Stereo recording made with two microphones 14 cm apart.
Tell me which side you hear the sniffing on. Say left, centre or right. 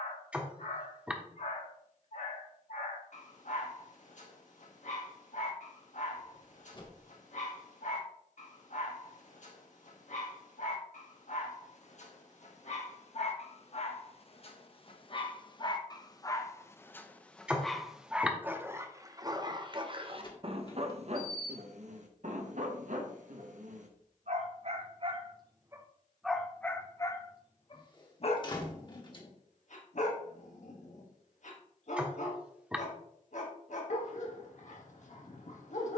centre.